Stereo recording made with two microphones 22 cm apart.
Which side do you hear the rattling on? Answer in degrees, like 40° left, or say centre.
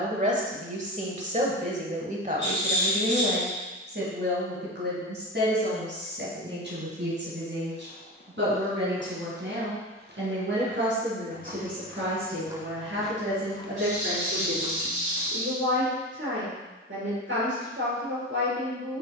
30° right.